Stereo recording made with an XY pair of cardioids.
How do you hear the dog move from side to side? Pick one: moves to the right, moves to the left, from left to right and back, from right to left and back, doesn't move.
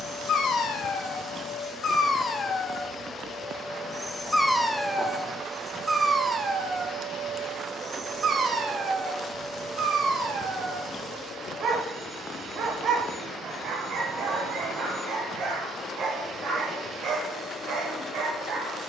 moves to the right.